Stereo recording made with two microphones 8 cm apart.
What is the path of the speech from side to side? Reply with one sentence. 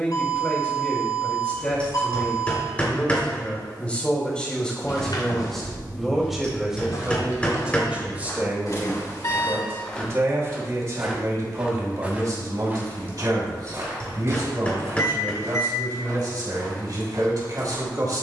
You can hear the speech move from left to right.